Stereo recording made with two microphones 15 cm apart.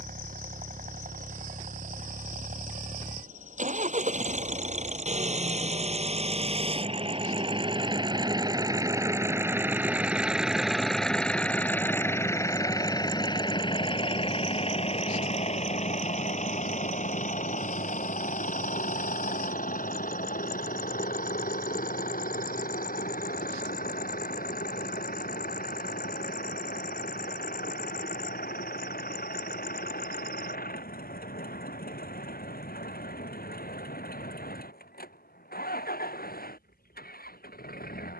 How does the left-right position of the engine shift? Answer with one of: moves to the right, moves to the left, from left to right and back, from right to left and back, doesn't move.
moves to the left.